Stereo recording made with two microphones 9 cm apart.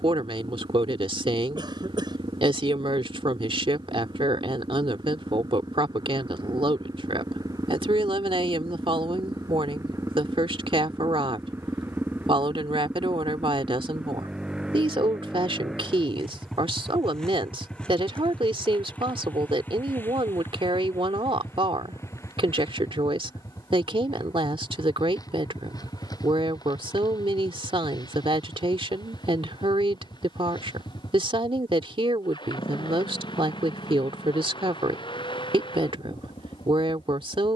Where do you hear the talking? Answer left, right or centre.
right.